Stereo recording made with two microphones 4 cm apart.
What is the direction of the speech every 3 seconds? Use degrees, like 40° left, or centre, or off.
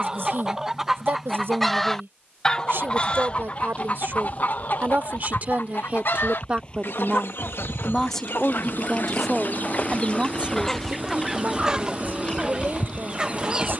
70° right, 50° right, 10° right, 30° right, 60° right.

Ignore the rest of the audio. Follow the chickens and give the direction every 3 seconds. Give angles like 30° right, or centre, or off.
centre, 50° left, 70° left, 20° left, 20° right.